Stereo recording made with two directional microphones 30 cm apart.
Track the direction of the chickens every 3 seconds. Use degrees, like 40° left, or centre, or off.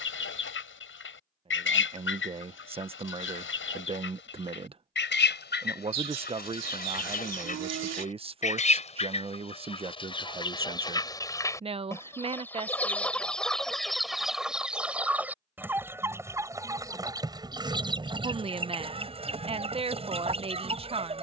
40° left, 40° left, 30° left, 20° left, centre, 10° right, 20° right.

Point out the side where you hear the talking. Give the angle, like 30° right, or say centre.
20° right.